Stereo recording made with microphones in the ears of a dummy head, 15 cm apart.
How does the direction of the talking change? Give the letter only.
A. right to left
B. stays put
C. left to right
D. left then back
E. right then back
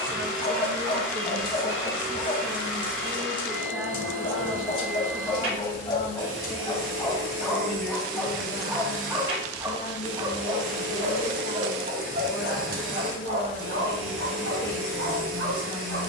A.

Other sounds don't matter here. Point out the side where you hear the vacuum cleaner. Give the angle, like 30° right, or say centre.
80° right.